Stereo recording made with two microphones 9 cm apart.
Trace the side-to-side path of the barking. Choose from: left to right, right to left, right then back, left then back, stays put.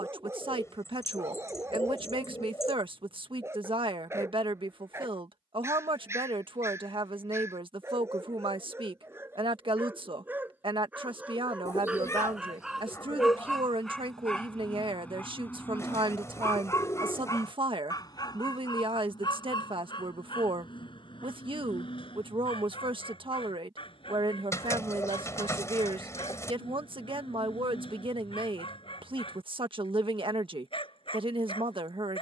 right to left.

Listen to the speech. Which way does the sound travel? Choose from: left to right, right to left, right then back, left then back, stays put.
stays put.